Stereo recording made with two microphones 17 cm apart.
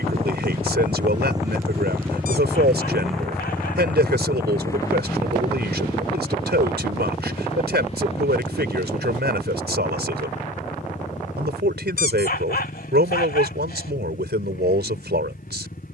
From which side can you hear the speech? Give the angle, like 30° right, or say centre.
80° right.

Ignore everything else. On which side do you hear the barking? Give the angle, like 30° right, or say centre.
70° left.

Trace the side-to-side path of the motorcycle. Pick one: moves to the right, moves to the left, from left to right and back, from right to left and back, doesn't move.
moves to the left.